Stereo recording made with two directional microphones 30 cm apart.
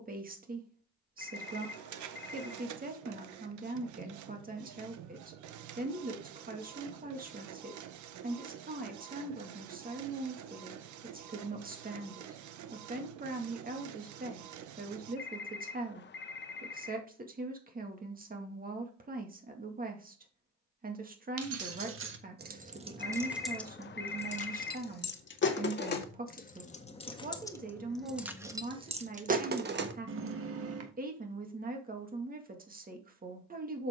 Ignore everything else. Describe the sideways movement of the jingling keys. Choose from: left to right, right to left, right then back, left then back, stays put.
left then back.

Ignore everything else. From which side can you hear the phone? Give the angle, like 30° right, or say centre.
40° left.